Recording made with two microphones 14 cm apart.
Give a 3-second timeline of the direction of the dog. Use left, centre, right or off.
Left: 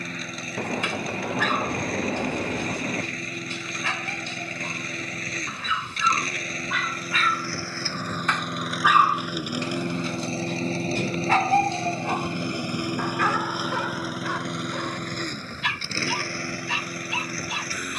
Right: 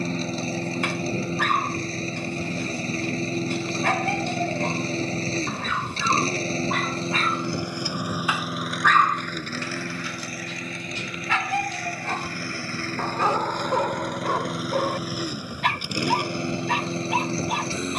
right, right, right, left, right, right.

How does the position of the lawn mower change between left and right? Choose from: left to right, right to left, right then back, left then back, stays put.
left then back.